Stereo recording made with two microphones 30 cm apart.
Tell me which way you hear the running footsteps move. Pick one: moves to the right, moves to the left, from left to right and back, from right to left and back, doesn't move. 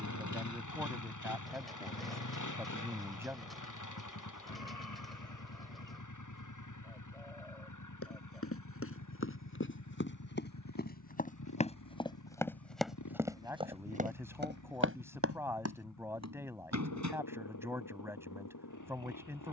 moves to the right.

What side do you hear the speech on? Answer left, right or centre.
centre.